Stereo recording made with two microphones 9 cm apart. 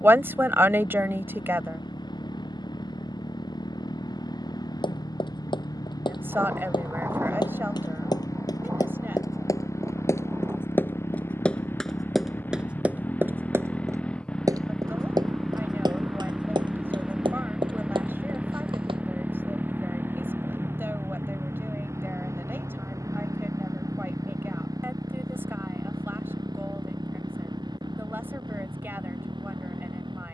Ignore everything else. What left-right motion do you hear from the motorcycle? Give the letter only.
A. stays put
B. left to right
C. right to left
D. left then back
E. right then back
B.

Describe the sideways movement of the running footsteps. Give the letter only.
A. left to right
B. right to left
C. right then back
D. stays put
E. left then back
A.